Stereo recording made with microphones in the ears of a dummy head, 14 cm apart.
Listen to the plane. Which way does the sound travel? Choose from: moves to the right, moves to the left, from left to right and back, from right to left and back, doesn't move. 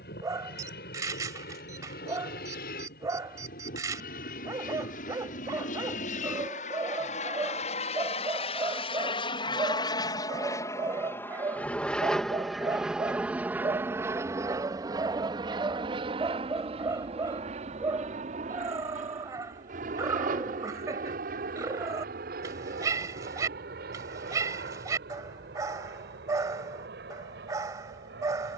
moves to the right.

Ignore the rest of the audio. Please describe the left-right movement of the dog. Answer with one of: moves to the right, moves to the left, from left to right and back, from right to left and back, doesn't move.
doesn't move.